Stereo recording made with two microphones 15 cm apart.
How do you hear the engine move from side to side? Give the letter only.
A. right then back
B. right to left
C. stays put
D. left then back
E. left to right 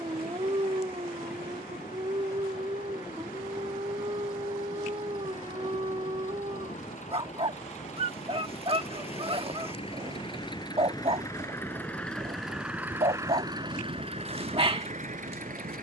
E.